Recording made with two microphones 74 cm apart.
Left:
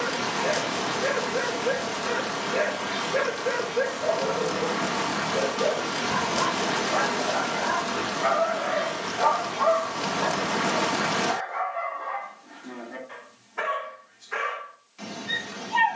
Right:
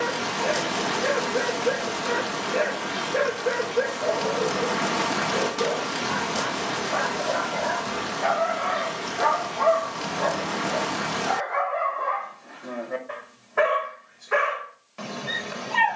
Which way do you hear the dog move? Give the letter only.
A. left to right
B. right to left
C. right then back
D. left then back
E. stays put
A.